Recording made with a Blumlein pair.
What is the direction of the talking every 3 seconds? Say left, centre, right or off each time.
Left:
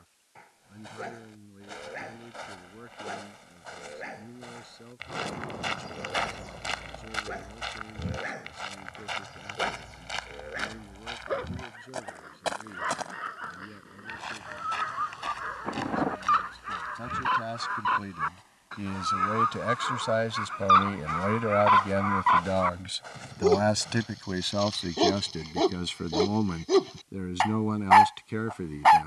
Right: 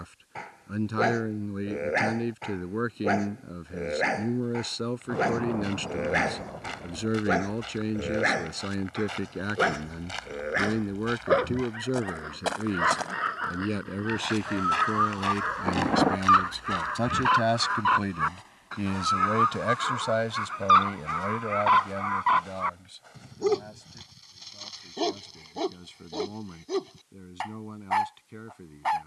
right, right, right, right, right, right, centre, left, left, left.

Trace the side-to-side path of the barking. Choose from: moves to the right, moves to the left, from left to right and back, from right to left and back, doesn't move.
moves to the left.